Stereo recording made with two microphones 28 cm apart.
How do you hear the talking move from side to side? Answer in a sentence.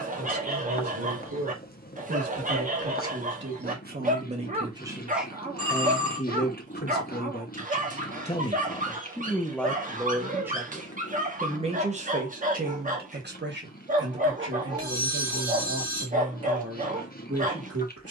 You can hear the talking go left and come back.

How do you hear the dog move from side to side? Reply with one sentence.
In this clip you hear the dog stay put.